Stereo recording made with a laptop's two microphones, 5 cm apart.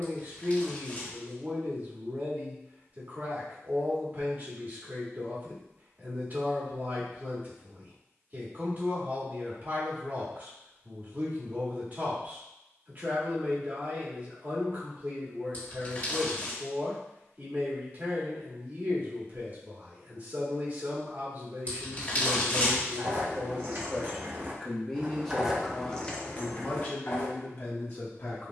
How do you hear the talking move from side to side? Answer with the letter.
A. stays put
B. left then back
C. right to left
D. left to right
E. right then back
C.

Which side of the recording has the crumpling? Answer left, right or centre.
left.